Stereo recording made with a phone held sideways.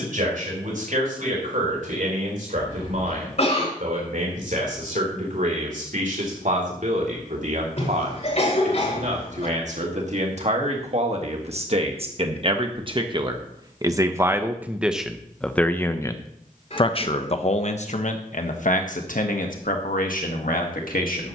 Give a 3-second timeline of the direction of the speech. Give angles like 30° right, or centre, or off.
70° right, 60° right, 60° right, 50° right, 30° right, 30° left, 70° left.